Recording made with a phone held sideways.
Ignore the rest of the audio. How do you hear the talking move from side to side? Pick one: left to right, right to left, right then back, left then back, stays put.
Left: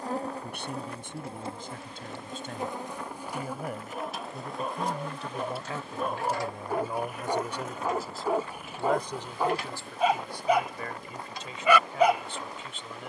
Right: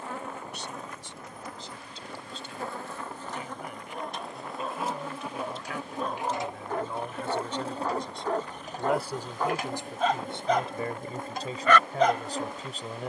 left to right.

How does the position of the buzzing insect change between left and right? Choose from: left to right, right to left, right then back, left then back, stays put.
left to right.